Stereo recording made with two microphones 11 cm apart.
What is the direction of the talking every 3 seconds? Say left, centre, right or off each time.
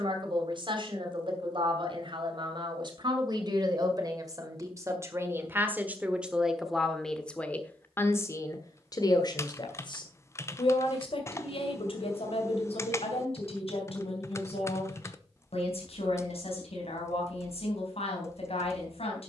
right, right, centre, left, left, left, left.